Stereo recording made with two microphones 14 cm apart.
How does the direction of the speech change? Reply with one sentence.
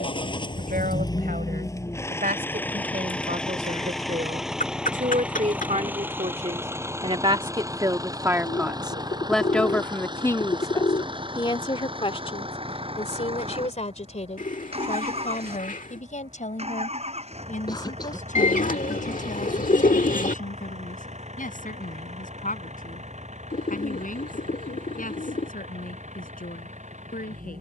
You can hear the speech move to the left.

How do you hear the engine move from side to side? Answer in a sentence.
You can hear the engine travel towards the right.